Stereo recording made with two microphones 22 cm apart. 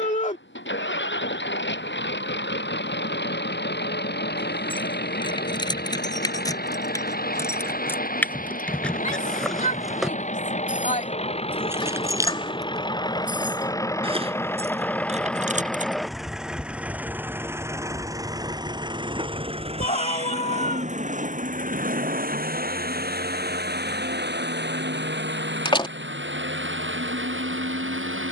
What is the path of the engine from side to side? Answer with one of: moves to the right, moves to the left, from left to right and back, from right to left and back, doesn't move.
moves to the right.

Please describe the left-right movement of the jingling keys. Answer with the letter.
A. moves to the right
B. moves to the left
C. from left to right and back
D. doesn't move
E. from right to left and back
A.